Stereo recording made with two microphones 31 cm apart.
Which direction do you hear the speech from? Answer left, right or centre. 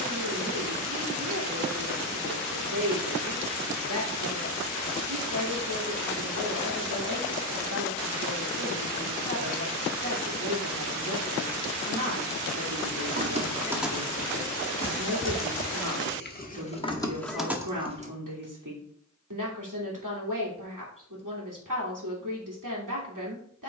right.